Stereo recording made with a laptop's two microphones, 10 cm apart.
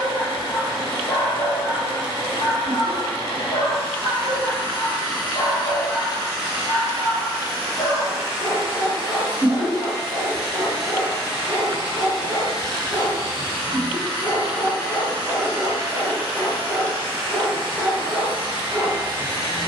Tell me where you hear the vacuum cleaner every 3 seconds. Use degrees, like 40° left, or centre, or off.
70° left, 60° left, 10° left, 10° left, 50° left, 60° left, 60° left.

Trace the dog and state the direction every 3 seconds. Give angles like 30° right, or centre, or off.
30° left, 30° left, 30° left, 30° left, 30° left, centre, 10° left.